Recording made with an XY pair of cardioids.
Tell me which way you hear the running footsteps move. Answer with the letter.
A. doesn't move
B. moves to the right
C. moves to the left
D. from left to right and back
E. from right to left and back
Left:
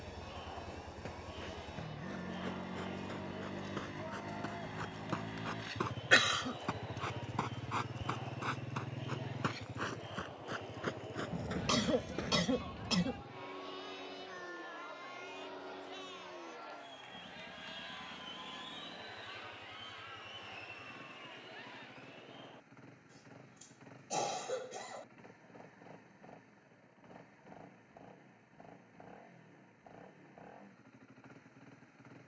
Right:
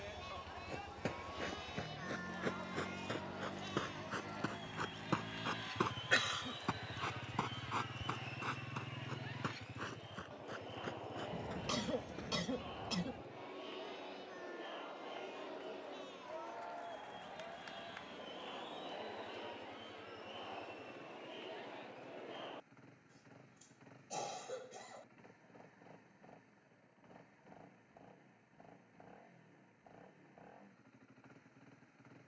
C.